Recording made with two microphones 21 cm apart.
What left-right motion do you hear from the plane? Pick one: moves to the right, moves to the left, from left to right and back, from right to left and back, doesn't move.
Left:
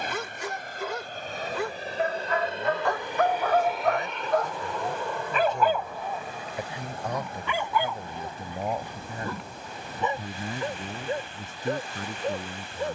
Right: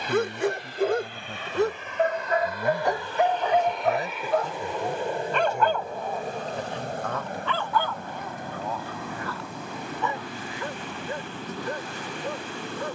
moves to the right.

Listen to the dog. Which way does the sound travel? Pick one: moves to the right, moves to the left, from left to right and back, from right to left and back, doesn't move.
moves to the left.